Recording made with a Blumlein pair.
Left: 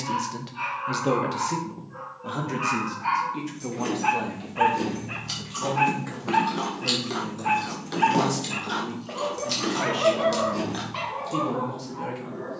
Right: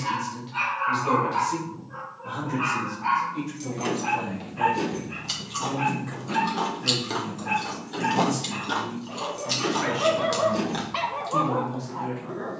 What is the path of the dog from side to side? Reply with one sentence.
You can hear the dog move from right to left and back again.